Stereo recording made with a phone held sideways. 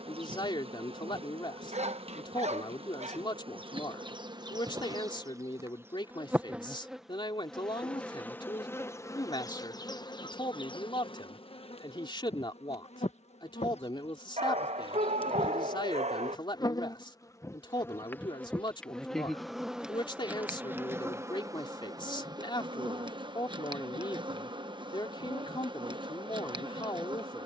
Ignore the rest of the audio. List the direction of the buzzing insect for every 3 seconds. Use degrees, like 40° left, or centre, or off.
40° right, 30° right, centre, 30° left, 40° left, 30° left, centre, 30° right, 30° right.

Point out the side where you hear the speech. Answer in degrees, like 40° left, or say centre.
30° left.